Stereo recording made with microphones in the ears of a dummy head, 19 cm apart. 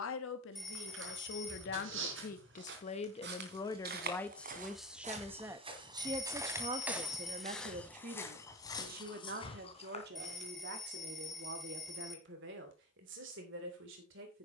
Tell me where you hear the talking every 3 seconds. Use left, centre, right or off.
left, centre, right, right, right.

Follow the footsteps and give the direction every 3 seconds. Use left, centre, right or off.
right, right, centre, left, off.